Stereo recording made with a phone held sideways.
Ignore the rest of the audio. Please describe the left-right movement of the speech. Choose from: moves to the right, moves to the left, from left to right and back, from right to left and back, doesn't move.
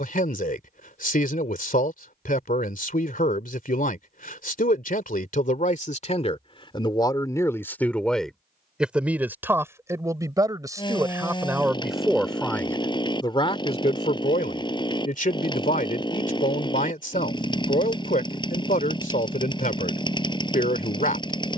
from left to right and back.